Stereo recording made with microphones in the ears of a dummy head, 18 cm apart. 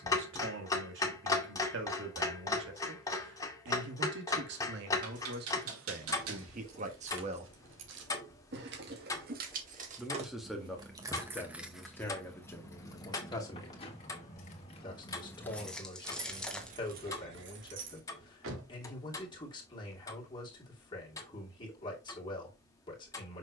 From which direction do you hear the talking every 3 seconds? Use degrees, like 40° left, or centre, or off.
70° right, 60° right, 40° right, centre, 20° left, 20° left, 20° left, 20° left.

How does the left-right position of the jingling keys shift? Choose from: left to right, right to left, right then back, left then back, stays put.
left then back.